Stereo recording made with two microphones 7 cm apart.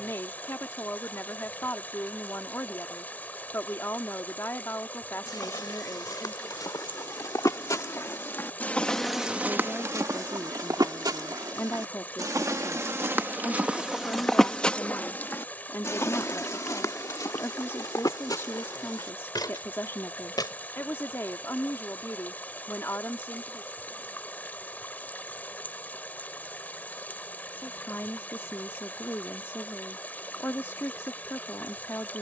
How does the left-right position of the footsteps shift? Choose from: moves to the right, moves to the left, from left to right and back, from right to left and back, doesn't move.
from left to right and back.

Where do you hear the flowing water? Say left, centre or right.
left.